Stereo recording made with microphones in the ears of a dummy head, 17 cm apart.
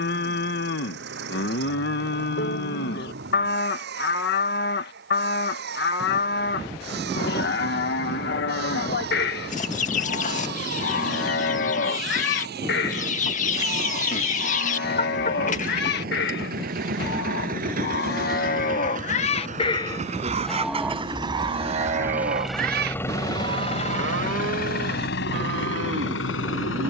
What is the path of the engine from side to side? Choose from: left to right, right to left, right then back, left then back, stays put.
right to left.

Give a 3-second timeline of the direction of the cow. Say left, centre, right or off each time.
left, left, left, left, left, left, left, right, right.